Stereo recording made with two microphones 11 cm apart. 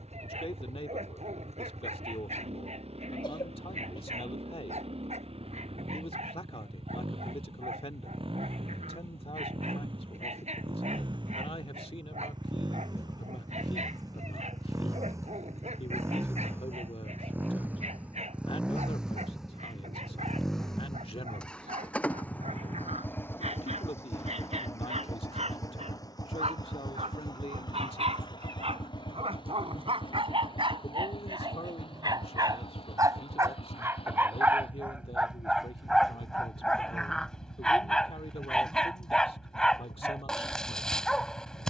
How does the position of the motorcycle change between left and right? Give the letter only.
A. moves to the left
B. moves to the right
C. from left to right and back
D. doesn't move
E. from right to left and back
A.